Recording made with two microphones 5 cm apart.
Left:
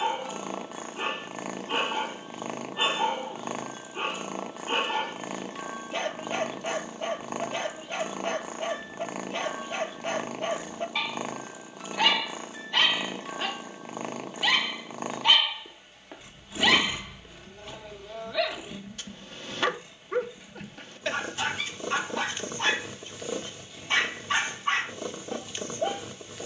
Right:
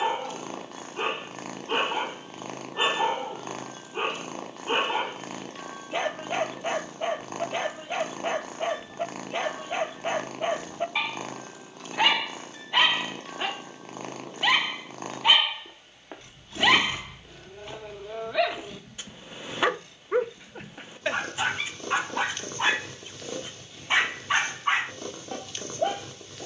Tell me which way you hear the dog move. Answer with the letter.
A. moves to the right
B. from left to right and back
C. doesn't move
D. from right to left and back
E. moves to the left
C.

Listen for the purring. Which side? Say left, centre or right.
centre.